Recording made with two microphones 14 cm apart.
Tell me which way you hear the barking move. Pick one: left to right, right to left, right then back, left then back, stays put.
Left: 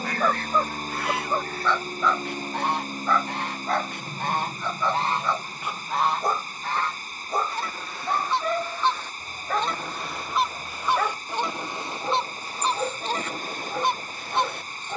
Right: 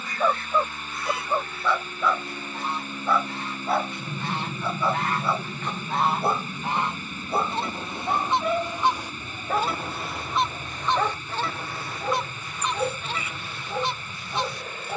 stays put.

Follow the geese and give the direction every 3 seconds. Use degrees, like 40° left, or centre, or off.
60° left, 40° left, 20° right, 10° left, 40° left.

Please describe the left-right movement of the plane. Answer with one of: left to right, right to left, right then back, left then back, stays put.
left to right.